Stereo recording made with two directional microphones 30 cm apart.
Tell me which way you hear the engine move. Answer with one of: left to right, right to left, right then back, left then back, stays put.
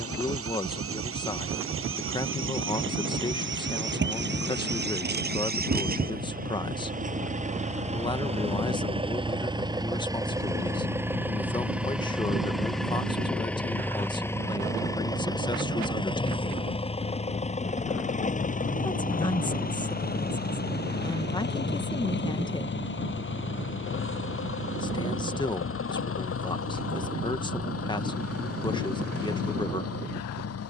right to left.